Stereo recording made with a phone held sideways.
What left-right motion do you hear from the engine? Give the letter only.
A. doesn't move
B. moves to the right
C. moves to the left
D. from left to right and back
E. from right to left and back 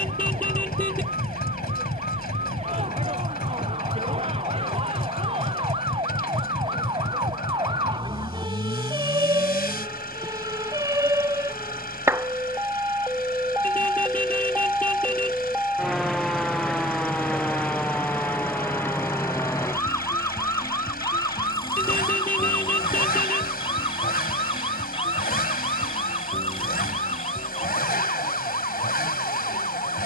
A.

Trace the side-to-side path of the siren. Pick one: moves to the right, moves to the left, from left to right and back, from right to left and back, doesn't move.
moves to the left.